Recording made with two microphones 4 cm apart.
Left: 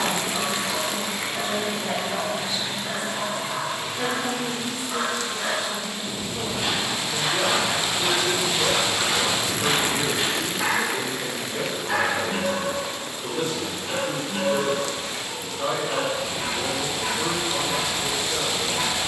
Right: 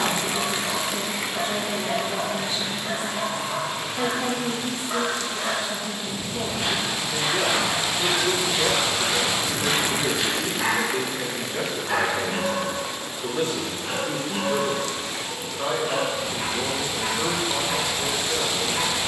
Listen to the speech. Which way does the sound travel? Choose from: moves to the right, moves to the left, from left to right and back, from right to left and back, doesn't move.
doesn't move.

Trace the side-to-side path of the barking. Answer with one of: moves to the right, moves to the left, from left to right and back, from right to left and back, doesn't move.
from right to left and back.